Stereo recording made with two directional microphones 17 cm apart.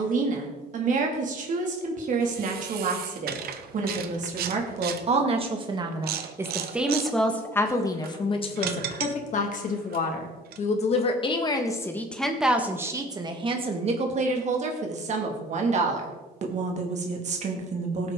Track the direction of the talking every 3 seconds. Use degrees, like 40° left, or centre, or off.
50° right, 40° right, 10° left, 40° left, 30° right, 40° right.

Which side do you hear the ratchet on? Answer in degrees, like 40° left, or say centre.
60° right.